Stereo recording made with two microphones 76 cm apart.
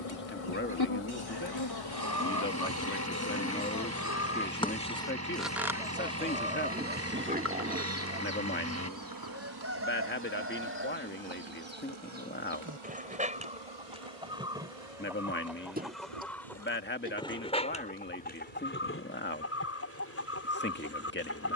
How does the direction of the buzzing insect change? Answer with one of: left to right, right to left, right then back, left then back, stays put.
left to right.